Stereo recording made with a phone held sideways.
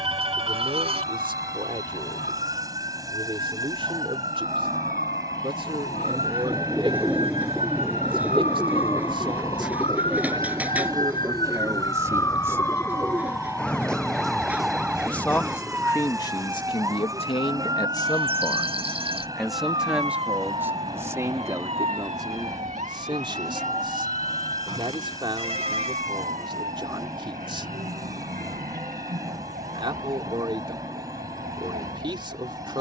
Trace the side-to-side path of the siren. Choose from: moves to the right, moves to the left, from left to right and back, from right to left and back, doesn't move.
moves to the right.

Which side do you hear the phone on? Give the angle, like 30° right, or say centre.
40° right.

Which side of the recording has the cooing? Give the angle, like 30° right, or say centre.
10° right.